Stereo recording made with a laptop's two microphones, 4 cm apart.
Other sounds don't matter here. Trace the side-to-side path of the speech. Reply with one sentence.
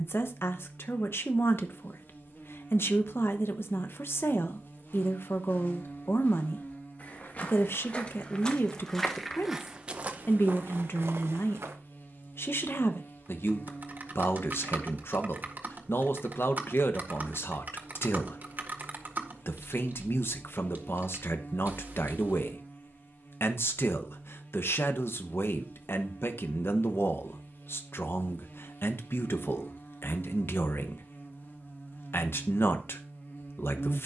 In this clip you hear the speech stay put.